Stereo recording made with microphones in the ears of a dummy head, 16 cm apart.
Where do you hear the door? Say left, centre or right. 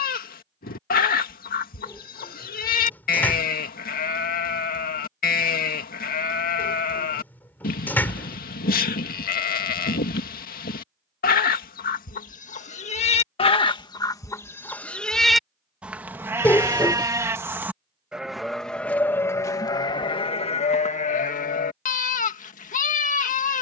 centre.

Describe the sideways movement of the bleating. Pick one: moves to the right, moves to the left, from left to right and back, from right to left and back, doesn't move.
from left to right and back.